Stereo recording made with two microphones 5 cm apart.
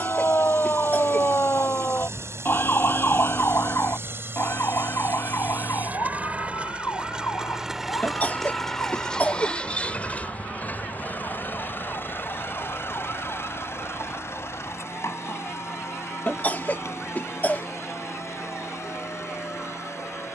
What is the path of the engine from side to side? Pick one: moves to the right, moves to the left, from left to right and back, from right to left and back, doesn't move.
moves to the left.